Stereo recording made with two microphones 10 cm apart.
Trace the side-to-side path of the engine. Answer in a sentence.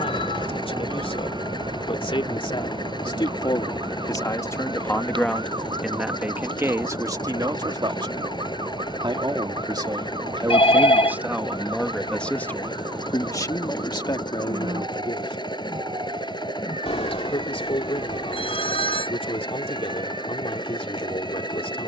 You can hear the engine stay in one place.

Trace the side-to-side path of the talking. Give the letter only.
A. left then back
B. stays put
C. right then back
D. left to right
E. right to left
C.